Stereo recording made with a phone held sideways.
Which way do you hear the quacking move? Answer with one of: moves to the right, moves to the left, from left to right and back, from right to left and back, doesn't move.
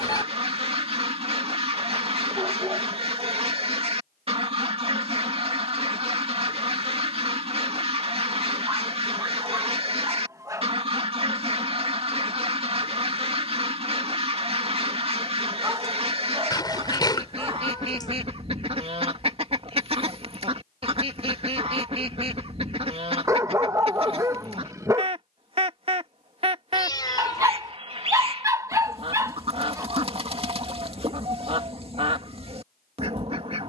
doesn't move.